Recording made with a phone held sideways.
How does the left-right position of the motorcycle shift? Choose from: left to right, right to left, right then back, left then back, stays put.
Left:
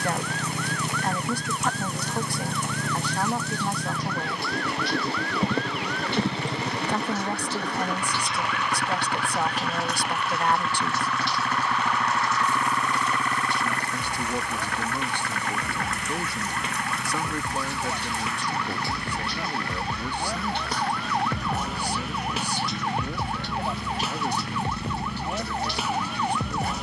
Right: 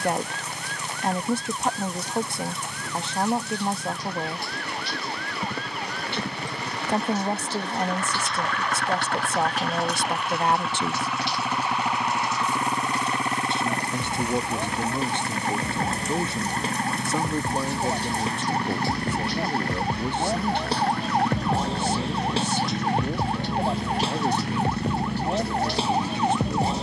left to right.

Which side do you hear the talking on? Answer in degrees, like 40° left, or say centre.
20° right.